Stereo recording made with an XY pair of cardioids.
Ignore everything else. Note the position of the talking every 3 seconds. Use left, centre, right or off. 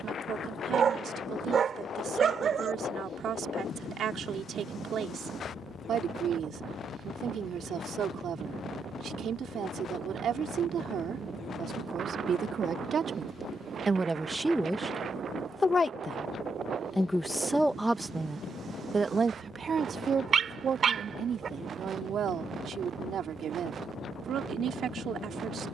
right, right, right, right, right, centre, right, right, right.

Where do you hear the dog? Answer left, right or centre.
right.